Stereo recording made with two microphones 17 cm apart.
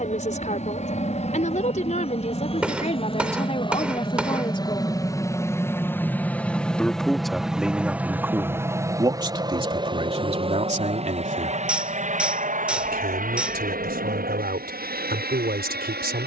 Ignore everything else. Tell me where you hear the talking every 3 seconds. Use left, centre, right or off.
left, left, centre, right, right, right.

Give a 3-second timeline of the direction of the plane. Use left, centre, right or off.
left, left, centre, right, right, right.